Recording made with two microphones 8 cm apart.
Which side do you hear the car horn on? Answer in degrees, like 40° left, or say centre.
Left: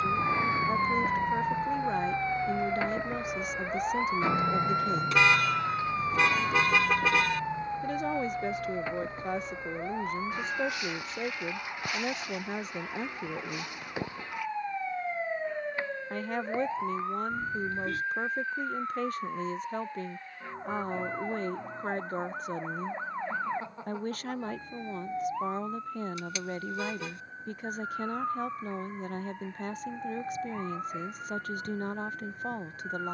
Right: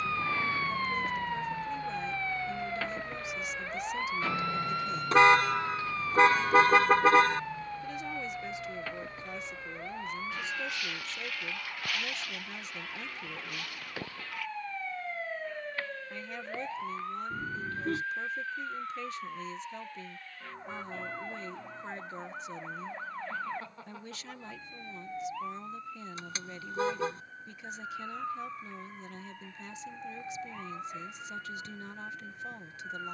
40° right.